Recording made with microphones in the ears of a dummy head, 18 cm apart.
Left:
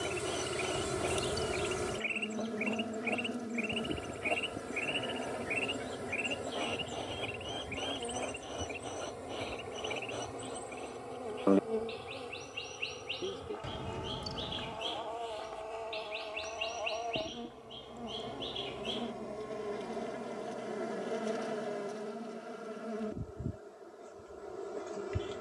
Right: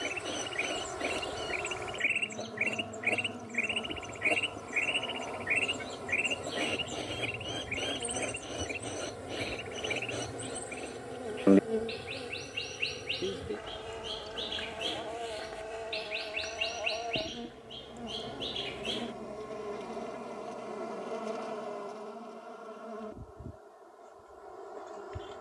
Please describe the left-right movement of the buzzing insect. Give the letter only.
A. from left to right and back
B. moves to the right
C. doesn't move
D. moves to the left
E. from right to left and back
A.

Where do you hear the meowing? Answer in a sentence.
In this clip you hear the meowing on the left.